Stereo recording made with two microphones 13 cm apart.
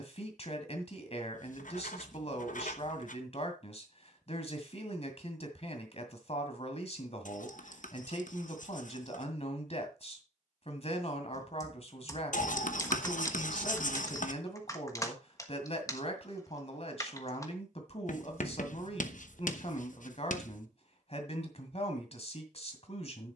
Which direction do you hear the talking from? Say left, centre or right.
left.